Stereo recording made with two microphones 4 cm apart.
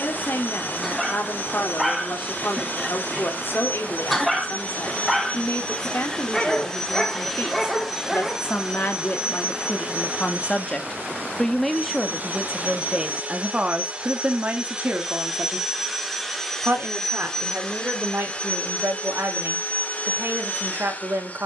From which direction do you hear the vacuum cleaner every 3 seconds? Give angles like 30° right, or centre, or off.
40° left, 30° left, centre, 30° right, 30° right, centre, 30° left.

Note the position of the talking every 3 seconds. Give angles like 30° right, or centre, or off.
60° left, 60° left, 60° left, 30° left, 20° right, 50° right, 60° right.